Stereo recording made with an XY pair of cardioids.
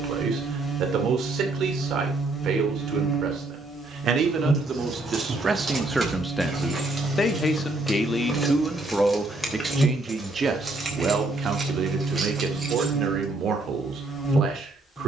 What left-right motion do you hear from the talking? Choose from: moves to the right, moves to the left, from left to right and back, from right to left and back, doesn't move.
from right to left and back.